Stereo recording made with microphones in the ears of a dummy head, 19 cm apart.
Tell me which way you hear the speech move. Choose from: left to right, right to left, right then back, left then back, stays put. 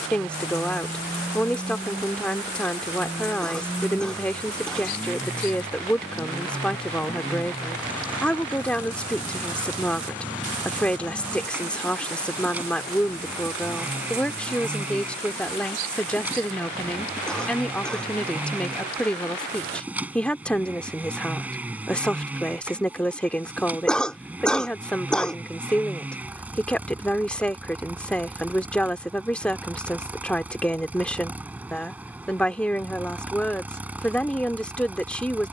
stays put.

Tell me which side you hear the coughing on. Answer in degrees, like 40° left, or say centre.
centre.